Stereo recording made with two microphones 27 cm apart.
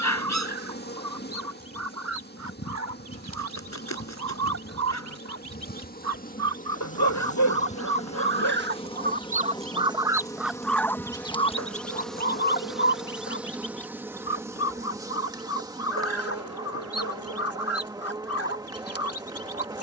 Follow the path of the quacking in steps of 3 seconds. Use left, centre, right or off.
right, right, right, centre, left, left, left.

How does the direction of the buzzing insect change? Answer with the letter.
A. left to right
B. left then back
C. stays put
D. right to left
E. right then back
A.